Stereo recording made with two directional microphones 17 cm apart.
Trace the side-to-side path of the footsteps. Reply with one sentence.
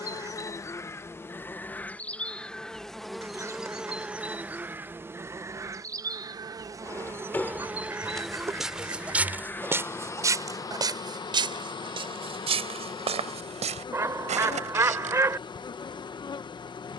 You can hear the footsteps move from left to right.